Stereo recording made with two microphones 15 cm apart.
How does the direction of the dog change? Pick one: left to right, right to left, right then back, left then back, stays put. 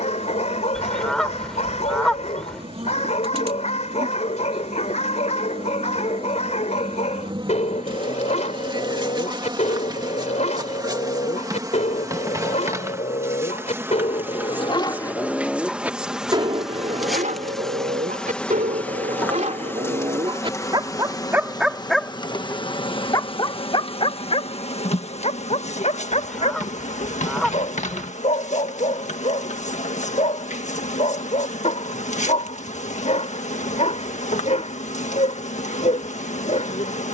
right then back.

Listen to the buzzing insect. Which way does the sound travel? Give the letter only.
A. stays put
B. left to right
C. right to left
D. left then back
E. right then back
C.